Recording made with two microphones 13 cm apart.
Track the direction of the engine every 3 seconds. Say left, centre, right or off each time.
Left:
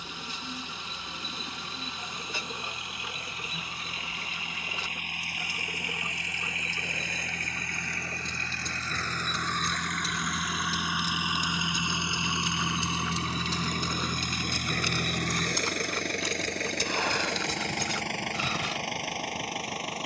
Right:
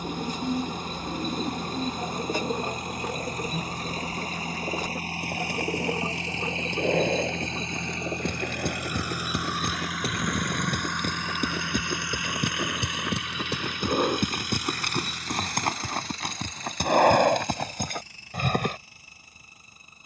right, right, right, centre, left, left, left.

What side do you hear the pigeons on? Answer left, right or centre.
right.